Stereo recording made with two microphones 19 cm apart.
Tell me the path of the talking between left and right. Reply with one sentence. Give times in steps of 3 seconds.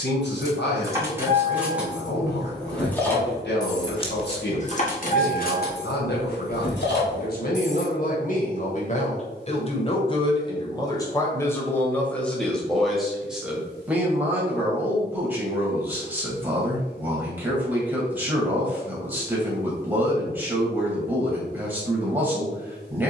In this clip you hear the talking on the left from 0 s and in the centre from 12 s.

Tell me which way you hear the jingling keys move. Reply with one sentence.
In this clip you hear the jingling keys move from right to left.